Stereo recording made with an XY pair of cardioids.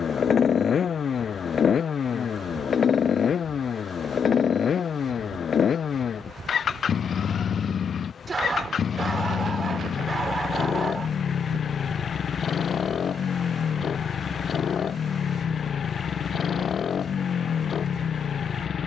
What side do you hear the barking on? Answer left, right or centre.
right.